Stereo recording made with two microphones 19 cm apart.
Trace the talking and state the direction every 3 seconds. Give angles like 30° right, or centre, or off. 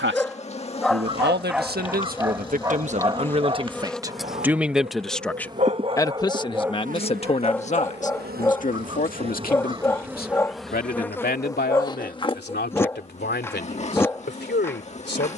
50° right, 10° right, 30° left, 50° left, 60° left.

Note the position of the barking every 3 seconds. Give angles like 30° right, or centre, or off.
10° right, 40° right, centre, 10° left, 10° left.